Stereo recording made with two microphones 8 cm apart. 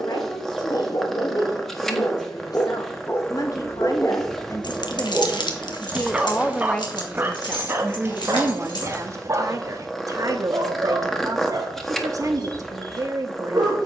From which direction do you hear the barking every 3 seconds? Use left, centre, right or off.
left, centre, right, right, right.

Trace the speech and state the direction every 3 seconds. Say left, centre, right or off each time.
left, left, centre, right, right.